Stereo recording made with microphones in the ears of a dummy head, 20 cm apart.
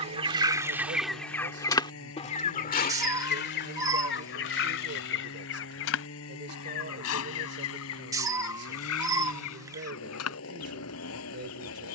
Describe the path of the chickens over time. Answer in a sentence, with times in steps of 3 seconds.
You can hear the chickens in the centre from 0 s and on the left from 3 s.